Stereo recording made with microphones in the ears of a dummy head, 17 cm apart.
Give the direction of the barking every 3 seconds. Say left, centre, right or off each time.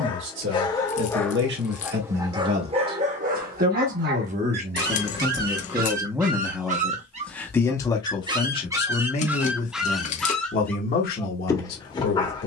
centre, right, right, centre.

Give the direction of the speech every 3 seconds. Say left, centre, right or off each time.
right, right, centre, left.